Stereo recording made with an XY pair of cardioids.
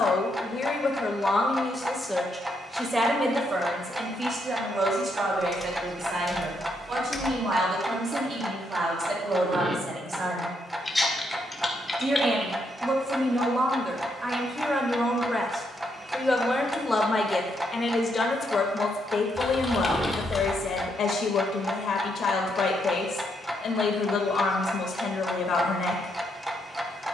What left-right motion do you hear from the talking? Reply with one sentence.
In this clip you hear the talking move from left to right and back again.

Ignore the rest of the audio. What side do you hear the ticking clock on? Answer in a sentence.
You can hear the ticking clock in the centre.